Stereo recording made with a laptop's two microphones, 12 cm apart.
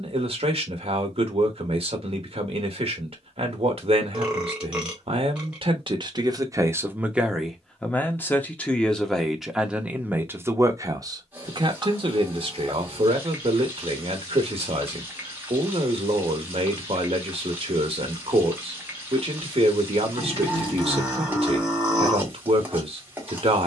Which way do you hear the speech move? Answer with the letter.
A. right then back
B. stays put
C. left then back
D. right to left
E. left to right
C.